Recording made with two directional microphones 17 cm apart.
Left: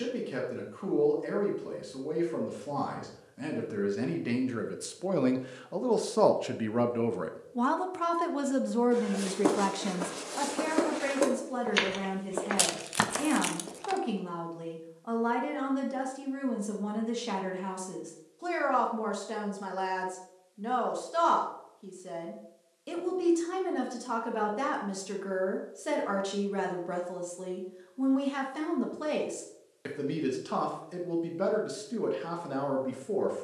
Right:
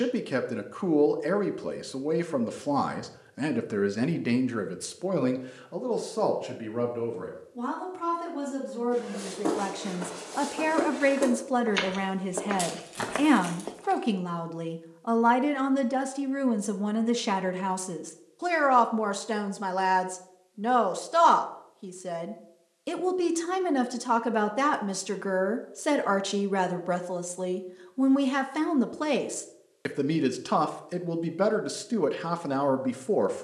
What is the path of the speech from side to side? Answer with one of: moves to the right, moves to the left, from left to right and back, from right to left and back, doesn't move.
from right to left and back.